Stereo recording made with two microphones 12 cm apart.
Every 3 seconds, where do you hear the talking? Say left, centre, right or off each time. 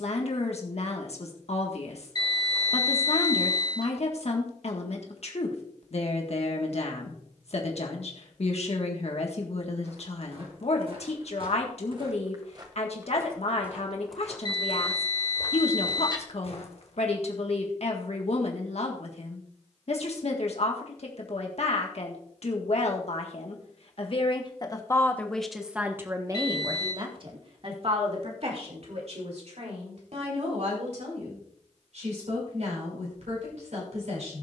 left, left, left, left, left, left, left, left, centre, right, right, right.